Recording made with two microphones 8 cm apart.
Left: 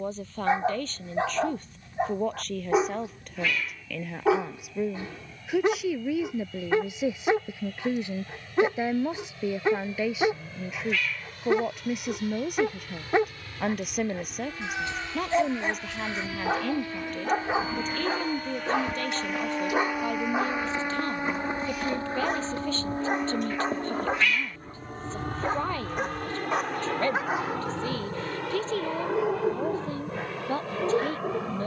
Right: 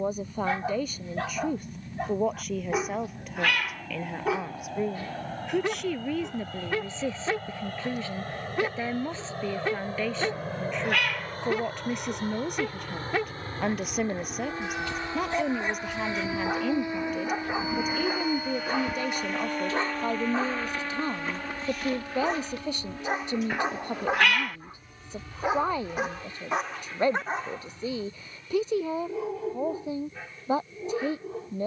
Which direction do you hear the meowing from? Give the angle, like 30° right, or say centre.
60° right.